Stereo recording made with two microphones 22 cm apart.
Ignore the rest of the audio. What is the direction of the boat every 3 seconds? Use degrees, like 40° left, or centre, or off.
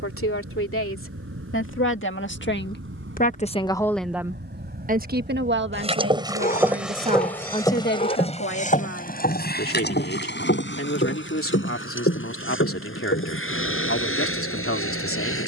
70° right, 50° right, 10° left, 50° left, 70° left.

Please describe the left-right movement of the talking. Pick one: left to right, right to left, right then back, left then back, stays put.
right then back.